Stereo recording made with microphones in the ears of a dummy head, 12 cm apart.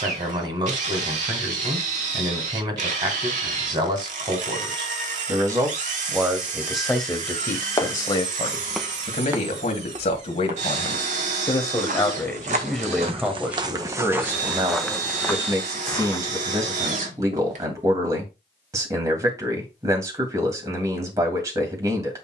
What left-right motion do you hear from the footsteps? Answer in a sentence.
In this clip you hear the footsteps go right and come back.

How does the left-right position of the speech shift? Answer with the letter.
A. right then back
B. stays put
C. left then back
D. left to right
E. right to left
C.